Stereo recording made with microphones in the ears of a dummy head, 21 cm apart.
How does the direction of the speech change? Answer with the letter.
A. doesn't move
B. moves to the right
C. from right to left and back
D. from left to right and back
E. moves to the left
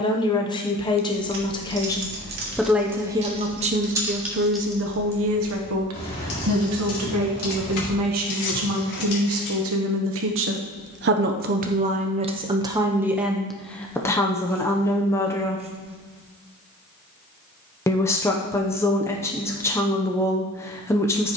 D.